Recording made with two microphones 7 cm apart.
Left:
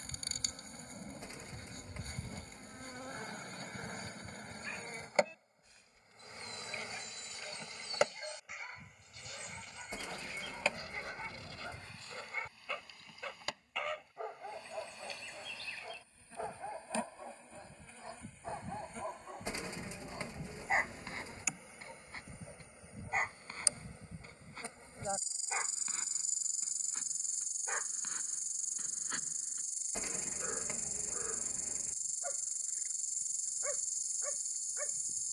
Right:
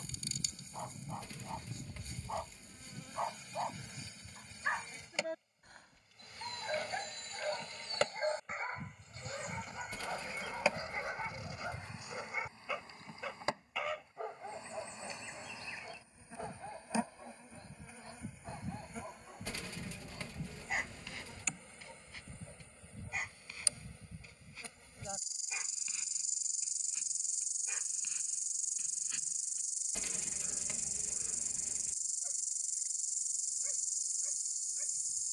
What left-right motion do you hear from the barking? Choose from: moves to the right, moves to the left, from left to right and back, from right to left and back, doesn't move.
moves to the left.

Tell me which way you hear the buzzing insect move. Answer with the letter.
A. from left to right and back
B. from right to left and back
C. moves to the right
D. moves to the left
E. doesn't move
A.